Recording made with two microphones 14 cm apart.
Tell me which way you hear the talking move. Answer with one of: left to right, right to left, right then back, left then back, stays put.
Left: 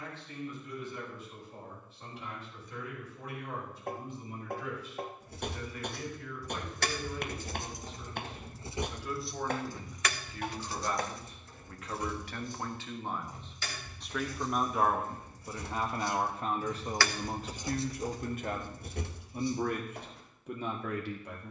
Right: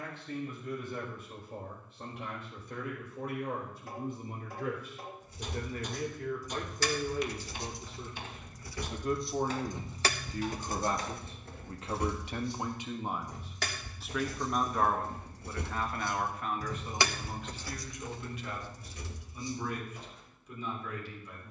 right to left.